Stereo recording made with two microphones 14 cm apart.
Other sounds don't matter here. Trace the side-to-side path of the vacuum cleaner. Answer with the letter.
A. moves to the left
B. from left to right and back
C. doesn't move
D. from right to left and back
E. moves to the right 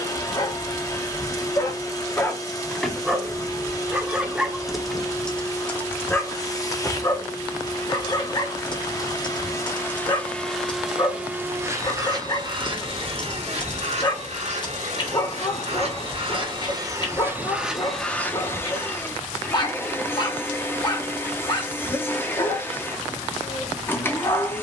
B.